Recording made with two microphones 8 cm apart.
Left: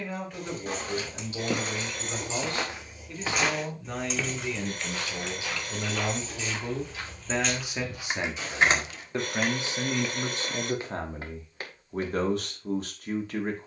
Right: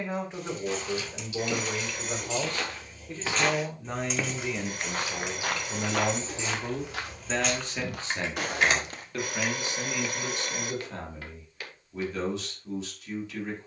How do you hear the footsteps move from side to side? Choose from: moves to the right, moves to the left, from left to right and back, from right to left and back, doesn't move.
from left to right and back.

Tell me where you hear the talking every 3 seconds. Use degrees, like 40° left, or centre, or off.
30° right, 10° right, 10° left, 30° left, 50° left.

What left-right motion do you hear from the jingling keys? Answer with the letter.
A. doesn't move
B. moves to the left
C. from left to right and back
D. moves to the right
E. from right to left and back
C.